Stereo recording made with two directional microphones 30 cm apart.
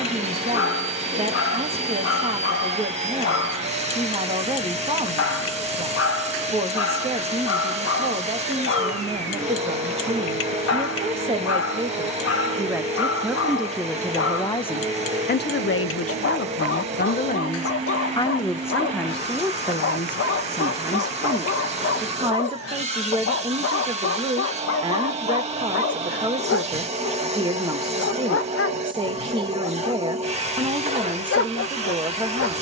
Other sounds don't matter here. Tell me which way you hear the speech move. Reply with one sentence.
You can hear the speech move from right to left and back again.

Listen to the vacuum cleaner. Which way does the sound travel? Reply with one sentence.
You can hear the vacuum cleaner stay put.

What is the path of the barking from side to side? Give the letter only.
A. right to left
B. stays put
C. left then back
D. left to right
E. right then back
B.